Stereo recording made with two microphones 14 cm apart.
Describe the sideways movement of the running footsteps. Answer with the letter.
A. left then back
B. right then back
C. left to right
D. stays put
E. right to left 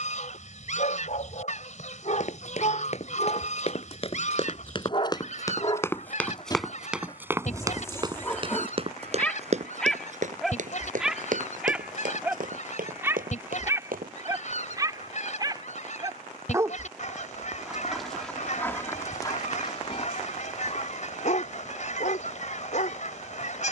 C.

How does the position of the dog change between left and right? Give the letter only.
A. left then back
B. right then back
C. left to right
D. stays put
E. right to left
B.